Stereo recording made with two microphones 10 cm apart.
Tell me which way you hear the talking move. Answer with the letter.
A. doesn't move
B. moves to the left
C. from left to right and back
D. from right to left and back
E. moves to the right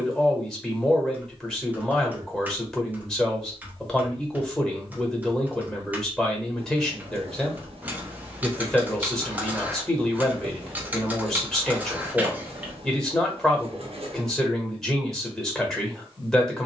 A.